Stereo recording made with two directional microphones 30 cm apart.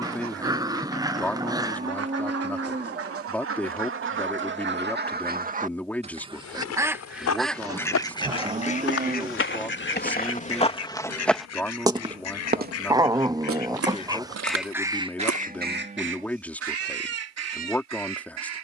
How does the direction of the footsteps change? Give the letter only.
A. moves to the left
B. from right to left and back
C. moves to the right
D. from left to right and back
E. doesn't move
C.